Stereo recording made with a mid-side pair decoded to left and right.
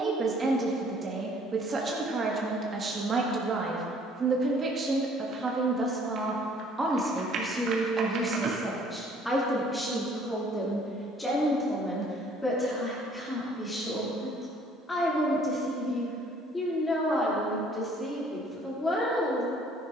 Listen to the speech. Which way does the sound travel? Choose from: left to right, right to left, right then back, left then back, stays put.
right to left.